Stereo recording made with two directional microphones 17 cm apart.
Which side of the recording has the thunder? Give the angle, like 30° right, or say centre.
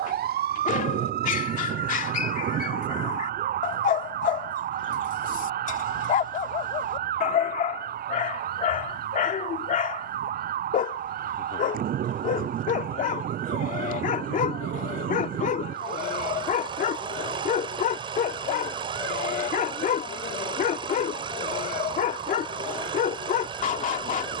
60° right.